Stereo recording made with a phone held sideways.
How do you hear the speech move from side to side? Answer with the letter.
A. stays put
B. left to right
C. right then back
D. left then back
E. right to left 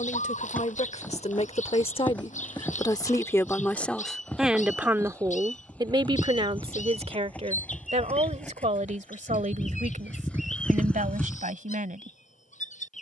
B.